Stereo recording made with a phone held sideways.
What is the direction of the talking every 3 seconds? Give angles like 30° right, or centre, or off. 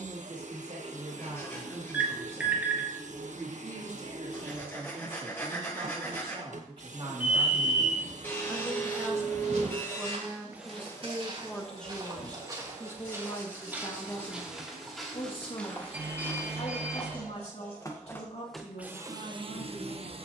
60° right, 50° right, 30° right, 10° right, 20° left, 50° left, 50° left.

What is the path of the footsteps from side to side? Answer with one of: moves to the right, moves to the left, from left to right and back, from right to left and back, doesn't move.
moves to the left.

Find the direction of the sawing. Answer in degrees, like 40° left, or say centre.
20° left.